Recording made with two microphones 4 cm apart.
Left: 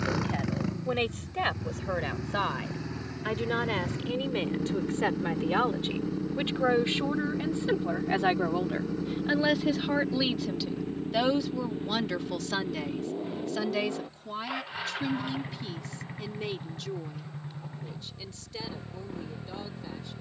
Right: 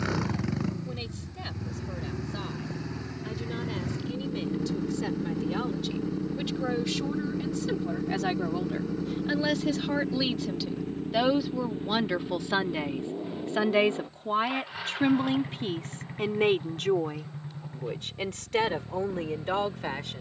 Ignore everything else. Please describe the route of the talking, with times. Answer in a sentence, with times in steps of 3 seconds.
You can hear the talking on the left from 0 s, in the centre from 9 s and on the right from 12 s.